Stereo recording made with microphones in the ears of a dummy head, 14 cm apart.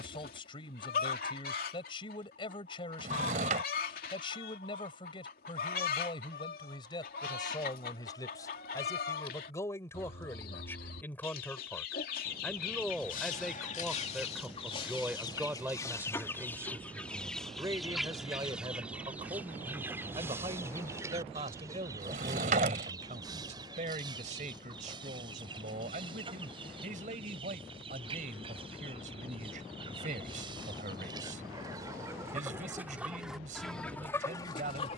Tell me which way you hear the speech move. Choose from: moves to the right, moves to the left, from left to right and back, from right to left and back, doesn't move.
moves to the right.